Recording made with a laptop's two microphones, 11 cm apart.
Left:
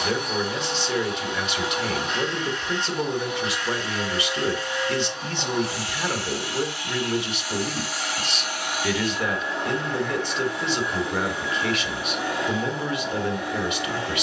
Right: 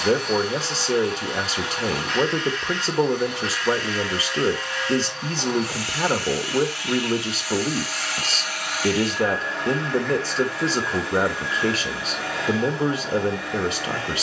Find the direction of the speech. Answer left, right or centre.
right.